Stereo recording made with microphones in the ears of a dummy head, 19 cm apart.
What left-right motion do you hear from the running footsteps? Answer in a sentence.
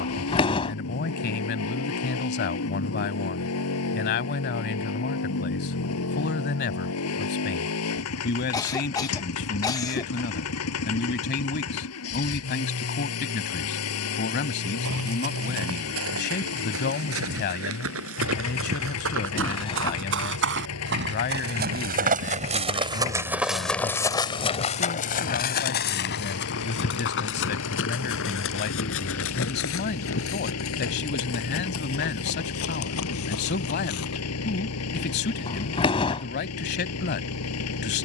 In this clip you hear the running footsteps travel towards the left.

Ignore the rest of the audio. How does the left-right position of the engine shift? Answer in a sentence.
In this clip you hear the engine stay put.